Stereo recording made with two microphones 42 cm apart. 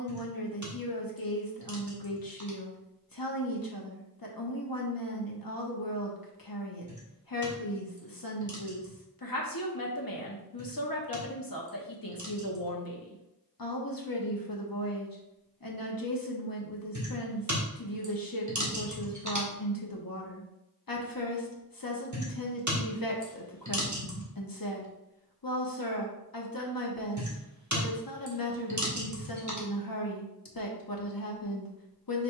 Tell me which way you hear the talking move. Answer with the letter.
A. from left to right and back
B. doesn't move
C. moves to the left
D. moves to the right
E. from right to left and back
B.